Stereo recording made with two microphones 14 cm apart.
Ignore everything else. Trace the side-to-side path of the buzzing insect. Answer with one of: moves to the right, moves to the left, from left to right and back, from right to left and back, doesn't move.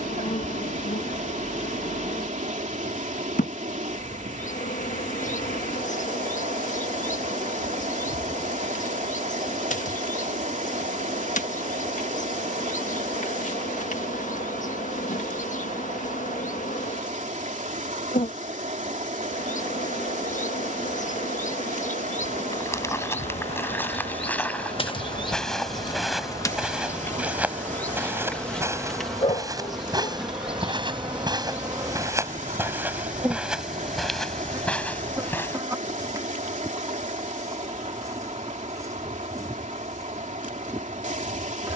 moves to the right.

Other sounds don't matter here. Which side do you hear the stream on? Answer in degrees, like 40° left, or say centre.
60° right.